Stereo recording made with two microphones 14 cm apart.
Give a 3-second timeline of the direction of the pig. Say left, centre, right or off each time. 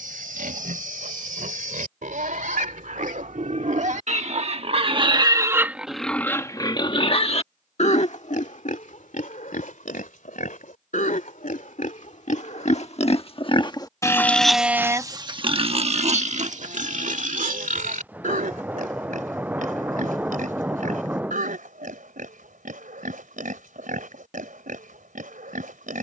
right, right, left, left, left, right, right, right, right.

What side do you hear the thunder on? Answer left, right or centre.
centre.